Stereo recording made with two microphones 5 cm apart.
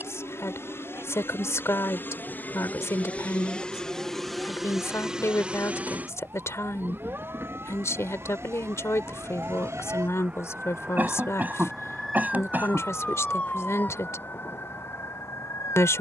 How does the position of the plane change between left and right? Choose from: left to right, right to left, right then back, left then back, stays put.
left to right.